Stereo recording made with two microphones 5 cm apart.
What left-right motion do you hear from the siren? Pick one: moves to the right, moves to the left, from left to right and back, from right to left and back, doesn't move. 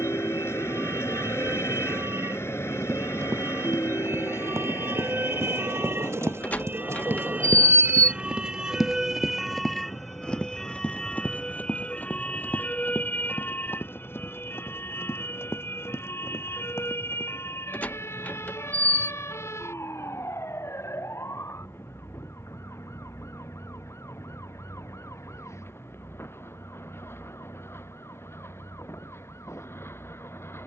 moves to the left.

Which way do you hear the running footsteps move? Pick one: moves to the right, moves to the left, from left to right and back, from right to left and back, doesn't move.
moves to the left.